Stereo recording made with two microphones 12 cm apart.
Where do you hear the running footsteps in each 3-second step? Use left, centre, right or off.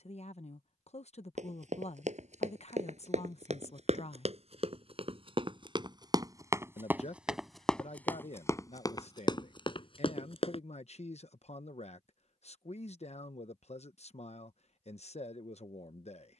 right, right, centre, left, off, off.